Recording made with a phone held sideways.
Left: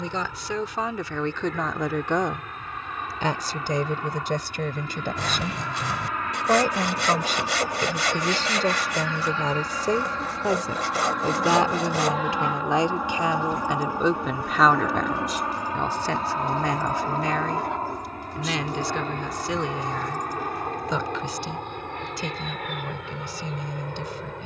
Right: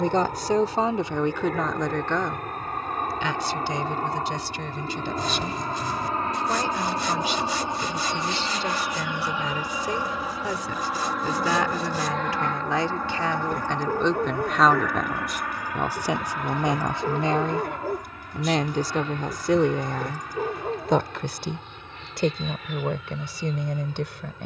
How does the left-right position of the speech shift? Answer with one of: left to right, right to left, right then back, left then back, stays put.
left then back.